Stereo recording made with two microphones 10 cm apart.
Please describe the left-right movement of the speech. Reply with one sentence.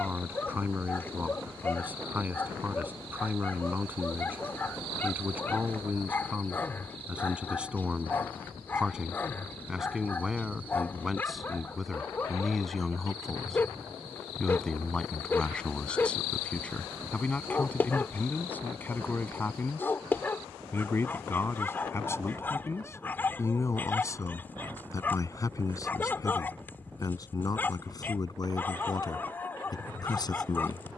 In this clip you hear the speech move to the left.